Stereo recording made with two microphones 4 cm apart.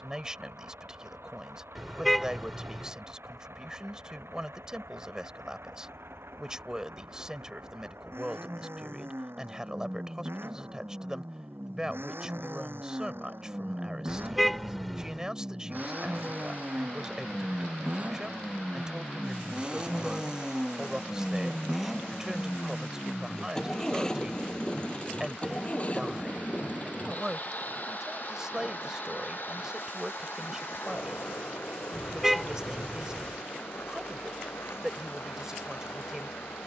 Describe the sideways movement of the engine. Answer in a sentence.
You can hear the engine go from the right side to the left.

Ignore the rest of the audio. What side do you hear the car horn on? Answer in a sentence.
You can hear the car horn in the centre.